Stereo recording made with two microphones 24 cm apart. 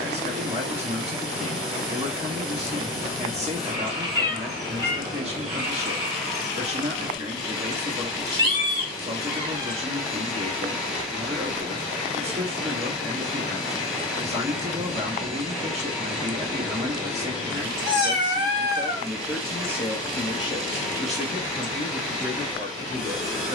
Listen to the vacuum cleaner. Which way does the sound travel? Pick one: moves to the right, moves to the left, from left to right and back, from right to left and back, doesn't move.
doesn't move.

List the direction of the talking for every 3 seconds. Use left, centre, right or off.
right, right, right, right, right, right, centre, left.